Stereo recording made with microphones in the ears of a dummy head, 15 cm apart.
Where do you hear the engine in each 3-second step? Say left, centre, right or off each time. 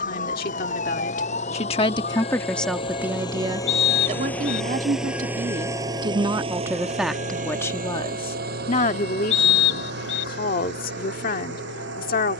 left, centre, right, right.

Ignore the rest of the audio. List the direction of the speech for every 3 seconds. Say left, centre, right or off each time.
left, right, centre, left.